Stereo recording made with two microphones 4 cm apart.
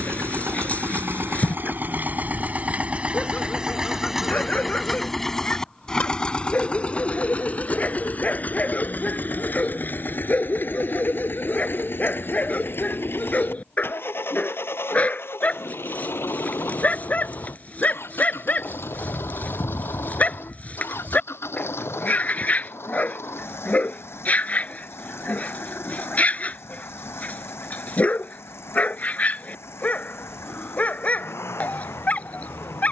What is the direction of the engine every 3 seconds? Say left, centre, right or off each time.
right, centre, left, left, left, left, left, left, left, left, left.